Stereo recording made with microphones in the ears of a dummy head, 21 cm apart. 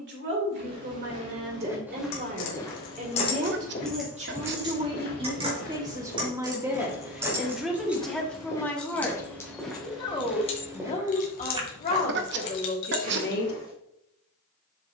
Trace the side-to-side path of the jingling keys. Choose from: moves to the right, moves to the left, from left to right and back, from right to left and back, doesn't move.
from left to right and back.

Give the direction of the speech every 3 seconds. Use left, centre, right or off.
right, right, centre, left, left.